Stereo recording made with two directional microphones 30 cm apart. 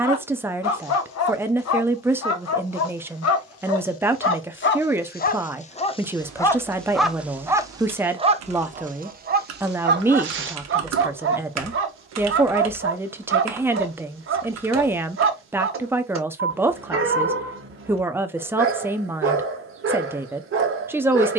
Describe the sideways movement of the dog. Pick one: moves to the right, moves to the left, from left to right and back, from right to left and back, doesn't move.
moves to the right.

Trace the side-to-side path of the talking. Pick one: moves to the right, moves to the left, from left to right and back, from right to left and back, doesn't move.
doesn't move.